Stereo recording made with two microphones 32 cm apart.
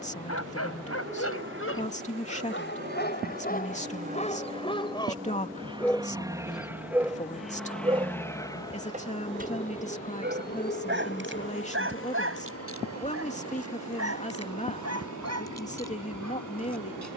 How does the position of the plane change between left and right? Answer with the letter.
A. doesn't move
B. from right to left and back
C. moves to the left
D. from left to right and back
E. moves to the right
C.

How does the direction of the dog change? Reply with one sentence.
In this clip you hear the dog move from left to right.